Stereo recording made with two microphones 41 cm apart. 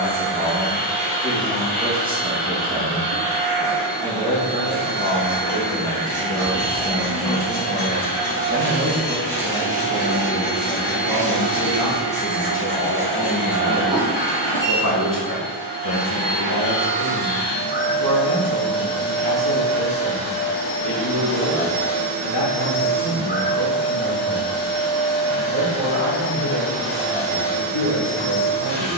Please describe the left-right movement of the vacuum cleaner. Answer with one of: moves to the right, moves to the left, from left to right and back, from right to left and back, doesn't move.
doesn't move.